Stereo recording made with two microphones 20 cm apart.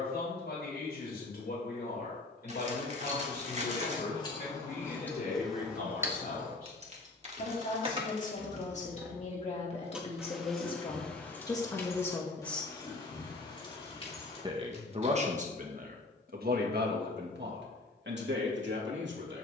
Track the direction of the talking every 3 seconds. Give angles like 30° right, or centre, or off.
60° left, 50° left, 40° left, 30° left, 10° right, 50° right, 70° right.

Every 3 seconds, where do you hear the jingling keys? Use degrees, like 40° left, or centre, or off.
off, 20° left, 30° right, centre, 20° left, off, off.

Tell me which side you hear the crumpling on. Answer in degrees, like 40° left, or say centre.
40° right.